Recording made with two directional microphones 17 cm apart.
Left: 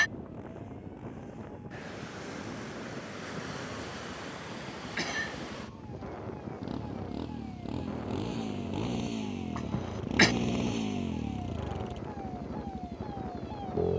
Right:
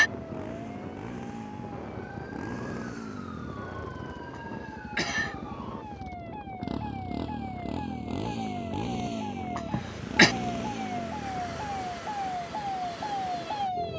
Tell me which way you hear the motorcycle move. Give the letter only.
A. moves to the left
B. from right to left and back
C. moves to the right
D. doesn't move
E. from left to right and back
A.